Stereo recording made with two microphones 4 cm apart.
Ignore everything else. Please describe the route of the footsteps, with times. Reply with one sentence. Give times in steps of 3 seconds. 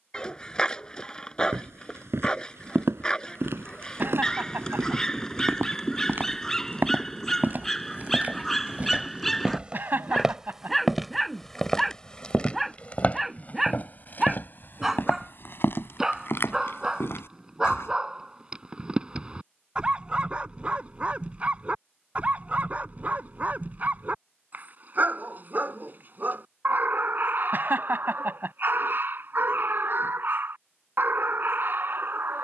In this clip you hear the footsteps on the right from 0 s, in the centre from 9 s, on the left from 12 s and not at all from 18 s.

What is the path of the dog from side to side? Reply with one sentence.
In this clip you hear the dog move to the right.